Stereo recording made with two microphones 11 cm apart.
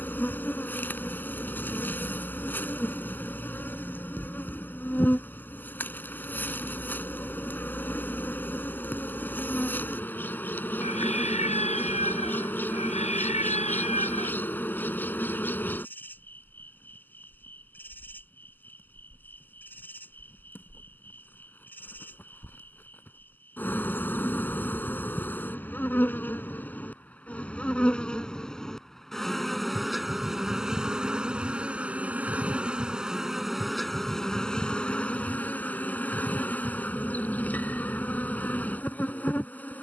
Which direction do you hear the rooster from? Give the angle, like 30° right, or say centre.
80° left.